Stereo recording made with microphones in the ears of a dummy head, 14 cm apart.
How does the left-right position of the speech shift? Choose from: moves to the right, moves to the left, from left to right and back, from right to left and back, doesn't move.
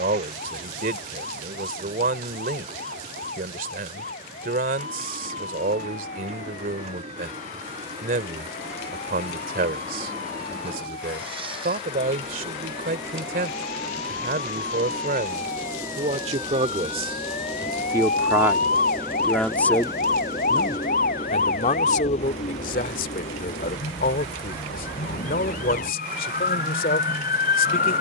moves to the left.